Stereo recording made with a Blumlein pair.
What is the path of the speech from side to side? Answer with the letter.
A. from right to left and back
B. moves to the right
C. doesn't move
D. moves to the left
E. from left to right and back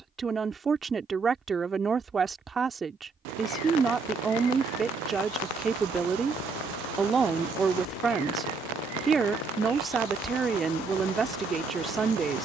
C.